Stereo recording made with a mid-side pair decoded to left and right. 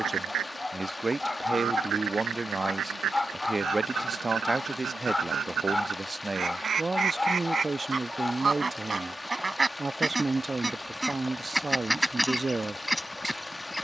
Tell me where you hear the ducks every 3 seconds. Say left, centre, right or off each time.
right, right, right, centre, centre.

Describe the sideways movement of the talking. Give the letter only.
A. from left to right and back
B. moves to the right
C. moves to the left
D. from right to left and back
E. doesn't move
E.